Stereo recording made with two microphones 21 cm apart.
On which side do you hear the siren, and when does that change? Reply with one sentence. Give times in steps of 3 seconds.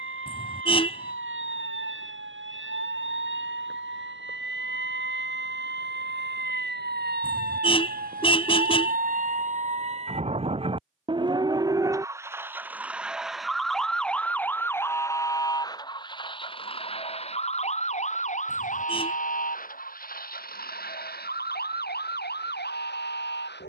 You can hear the siren on the right from 0 s, in the centre from 12 s and on the left from 15 s.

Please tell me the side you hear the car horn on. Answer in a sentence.
In this clip you hear the car horn on the left.